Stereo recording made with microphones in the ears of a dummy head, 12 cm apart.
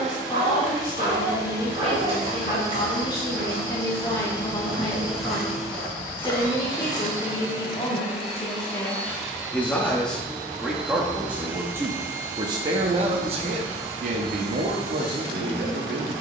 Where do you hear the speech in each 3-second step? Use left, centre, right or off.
left, left, left, centre, right, right.